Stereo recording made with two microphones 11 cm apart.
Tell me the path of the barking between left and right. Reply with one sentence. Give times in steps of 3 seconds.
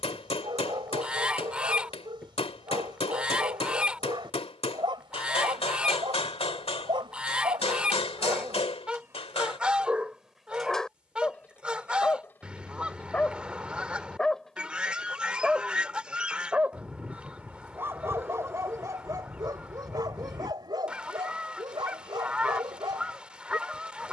In this clip you hear the barking on the right from 0 s, in the centre from 9 s and on the right from 18 s.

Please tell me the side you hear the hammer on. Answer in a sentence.
In this clip you hear the hammer on the left.